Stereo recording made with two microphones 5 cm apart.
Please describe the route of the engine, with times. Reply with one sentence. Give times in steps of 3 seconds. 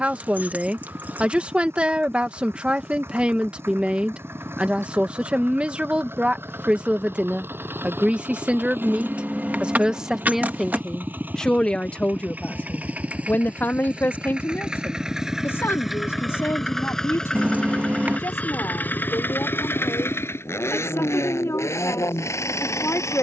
You can hear the engine on the right from 0 s, in the centre from 15 s and on the left from 18 s.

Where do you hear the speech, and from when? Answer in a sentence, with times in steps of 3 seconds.
In this clip you hear the speech on the right from 0 s, in the centre from 9 s and on the left from 12 s.